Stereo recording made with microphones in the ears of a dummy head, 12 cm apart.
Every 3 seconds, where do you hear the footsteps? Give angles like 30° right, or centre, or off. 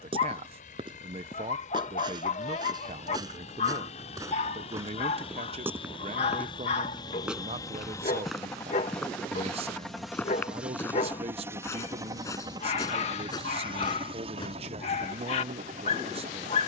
40° right, 20° right, centre, 10° left, 30° left, off.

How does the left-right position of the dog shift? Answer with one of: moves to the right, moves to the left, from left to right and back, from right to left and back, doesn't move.
doesn't move.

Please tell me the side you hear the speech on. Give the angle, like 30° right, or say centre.
40° right.